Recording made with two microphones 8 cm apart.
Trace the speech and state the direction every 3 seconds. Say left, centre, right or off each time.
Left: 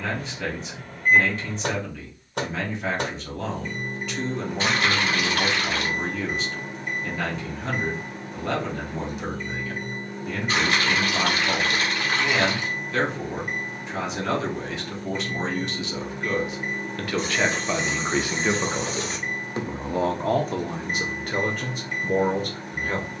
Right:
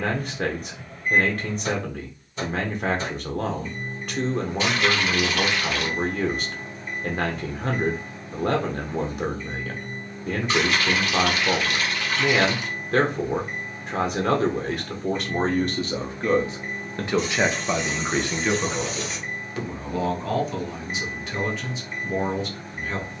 right, right, right, right, right, right, left, left.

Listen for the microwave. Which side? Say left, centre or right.
left.